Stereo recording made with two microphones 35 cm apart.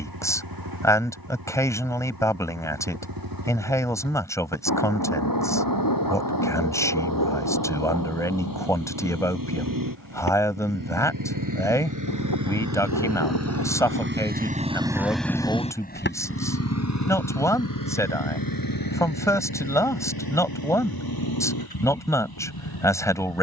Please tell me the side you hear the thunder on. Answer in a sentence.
You can hear the thunder on the left.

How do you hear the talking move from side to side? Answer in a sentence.
In this clip you hear the talking stay in one place.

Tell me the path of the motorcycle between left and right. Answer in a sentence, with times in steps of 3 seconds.
You can hear the motorcycle on the right from 0 s and on the left from 15 s.